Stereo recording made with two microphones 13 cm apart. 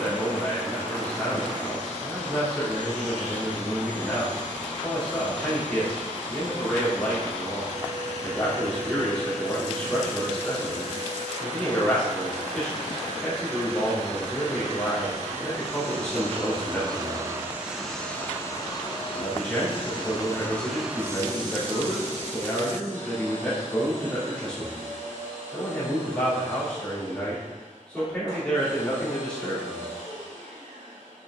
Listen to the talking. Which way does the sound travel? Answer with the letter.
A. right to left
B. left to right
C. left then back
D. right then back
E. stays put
E.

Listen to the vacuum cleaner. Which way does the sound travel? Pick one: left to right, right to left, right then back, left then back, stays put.
left then back.